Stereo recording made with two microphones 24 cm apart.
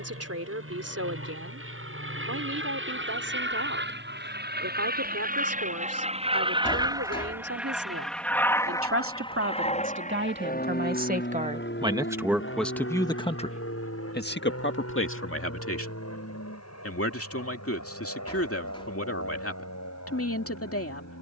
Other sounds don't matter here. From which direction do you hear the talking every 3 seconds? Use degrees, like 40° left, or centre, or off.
70° right, 70° right, 60° right, 40° right, 20° left, 60° left, 60° left.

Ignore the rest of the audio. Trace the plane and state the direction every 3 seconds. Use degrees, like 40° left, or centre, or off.
60° right, 40° right, 10° right, 30° left, 50° left, 60° left, 70° left.